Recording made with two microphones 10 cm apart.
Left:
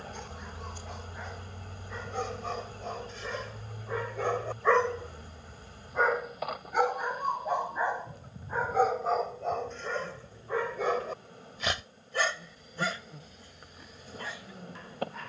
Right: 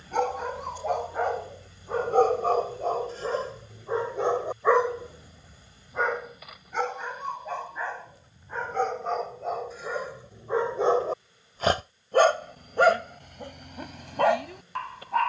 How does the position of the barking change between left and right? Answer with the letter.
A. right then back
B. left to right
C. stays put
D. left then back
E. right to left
D.